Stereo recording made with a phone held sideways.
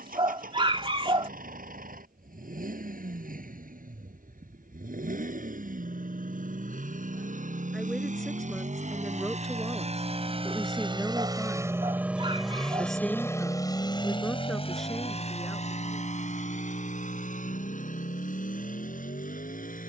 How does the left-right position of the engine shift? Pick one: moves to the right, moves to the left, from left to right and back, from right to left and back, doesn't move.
moves to the left.